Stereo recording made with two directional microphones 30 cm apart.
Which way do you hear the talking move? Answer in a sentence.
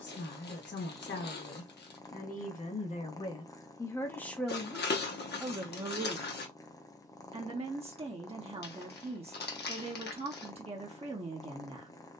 In this clip you hear the talking go from the left side to the right.